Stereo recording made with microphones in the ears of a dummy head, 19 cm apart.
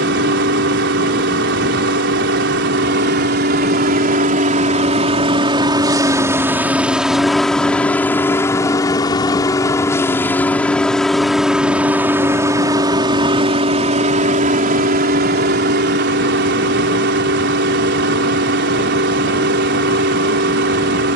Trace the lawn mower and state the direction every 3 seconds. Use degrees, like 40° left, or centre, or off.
60° right, 40° right, centre, 10° left, 30° right, 50° right, 50° right.